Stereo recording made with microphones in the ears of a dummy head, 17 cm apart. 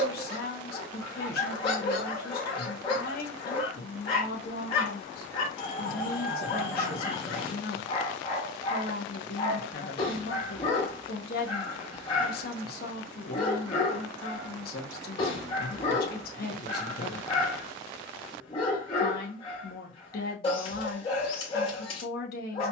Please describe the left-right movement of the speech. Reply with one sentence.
In this clip you hear the speech stay in one place.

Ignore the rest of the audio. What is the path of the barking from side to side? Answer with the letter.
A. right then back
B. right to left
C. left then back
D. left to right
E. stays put
E.